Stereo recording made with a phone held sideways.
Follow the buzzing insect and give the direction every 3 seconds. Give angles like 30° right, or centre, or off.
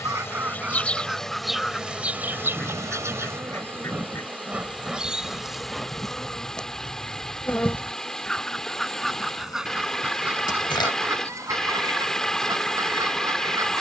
centre, 10° right, 10° left, 30° left, 30° left.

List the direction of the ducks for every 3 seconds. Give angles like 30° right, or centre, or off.
centre, 20° left, 10° left, 10° right, 30° right.